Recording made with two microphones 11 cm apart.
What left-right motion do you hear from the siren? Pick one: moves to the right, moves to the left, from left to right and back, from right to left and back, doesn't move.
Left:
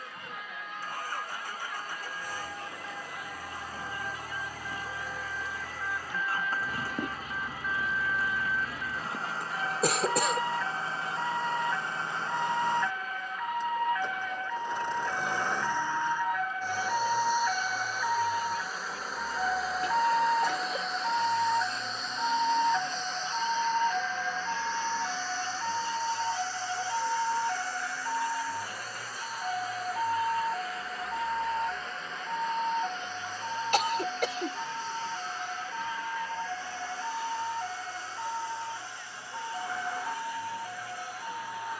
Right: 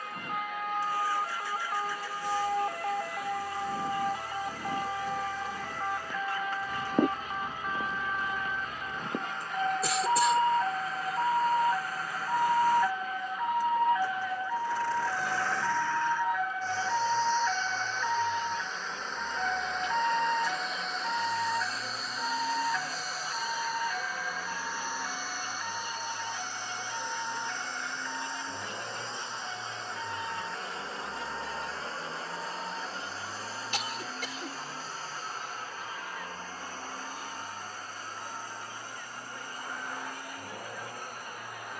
moves to the left.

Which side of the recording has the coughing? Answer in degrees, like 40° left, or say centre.
60° left.